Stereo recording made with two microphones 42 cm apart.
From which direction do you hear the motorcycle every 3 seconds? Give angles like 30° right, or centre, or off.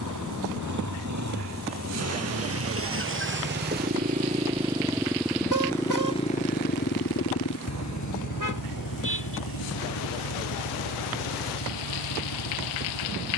40° right, 10° right, 40° left, 70° left, 80° left.